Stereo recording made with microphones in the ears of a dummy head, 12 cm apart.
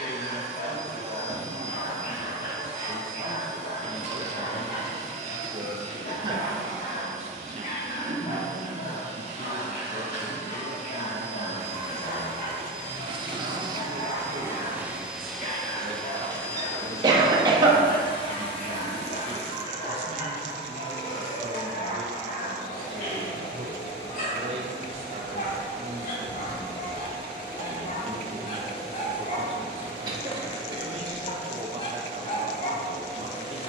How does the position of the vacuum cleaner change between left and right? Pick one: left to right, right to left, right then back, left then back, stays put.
right to left.